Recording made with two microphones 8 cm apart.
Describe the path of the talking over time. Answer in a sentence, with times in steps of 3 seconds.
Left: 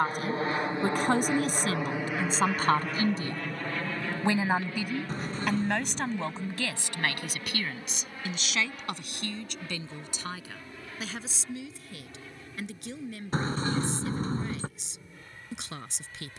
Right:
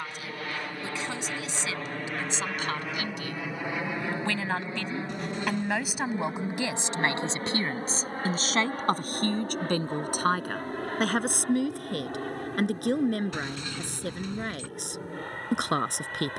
You can hear the talking on the left from 0 s, in the centre from 3 s and on the right from 6 s.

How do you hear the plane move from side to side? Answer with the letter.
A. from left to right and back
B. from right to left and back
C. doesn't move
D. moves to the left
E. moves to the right
E.